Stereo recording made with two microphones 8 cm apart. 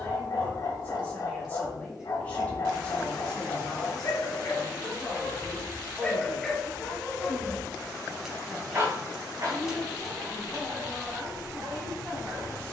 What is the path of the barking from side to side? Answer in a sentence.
In this clip you hear the barking travel towards the right.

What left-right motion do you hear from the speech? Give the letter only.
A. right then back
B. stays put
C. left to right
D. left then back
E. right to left
A.